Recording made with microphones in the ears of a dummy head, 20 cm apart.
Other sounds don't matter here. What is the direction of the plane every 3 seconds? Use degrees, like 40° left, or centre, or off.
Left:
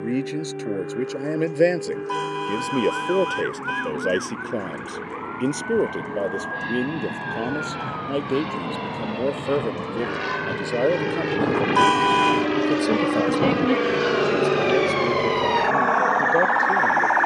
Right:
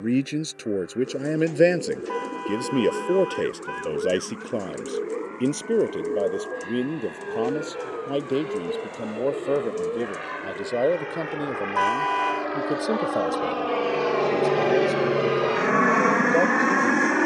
80° left, 70° left, 70° left, 60° left, 30° left, 30° right.